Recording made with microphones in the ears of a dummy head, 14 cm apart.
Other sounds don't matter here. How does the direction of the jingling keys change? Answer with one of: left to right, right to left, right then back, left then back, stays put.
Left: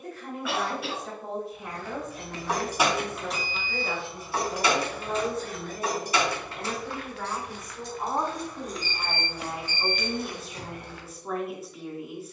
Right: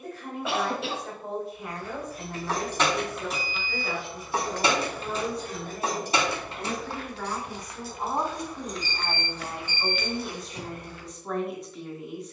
right then back.